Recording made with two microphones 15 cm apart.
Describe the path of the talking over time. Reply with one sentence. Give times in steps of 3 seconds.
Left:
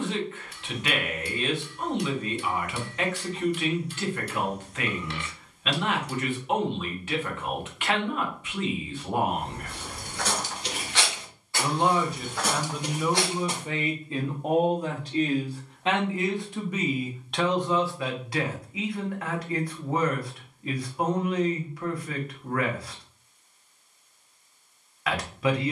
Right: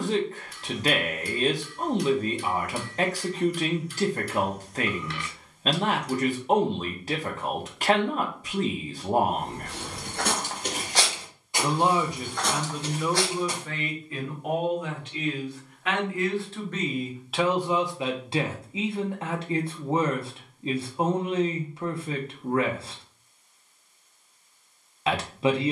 You can hear the talking on the right from 0 s, in the centre from 12 s and on the right from 18 s.